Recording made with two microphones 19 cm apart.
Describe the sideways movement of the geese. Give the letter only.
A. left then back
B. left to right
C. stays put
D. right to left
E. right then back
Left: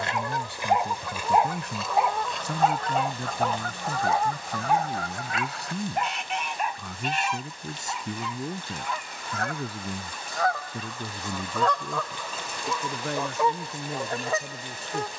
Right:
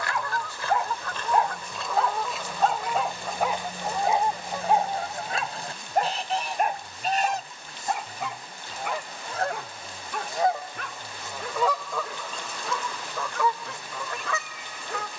E.